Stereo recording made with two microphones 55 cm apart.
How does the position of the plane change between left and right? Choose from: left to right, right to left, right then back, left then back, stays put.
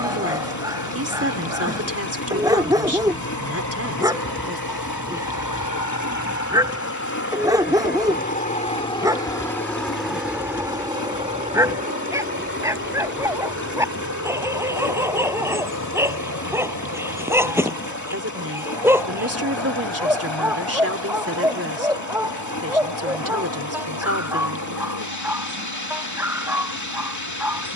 left to right.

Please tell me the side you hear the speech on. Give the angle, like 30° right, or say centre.
30° right.